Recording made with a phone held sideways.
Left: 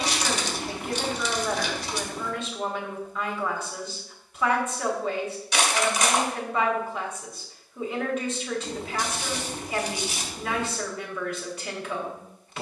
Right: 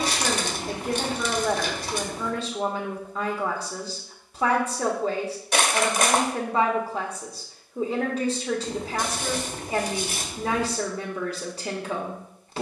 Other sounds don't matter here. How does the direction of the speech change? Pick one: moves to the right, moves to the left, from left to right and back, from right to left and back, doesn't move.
doesn't move.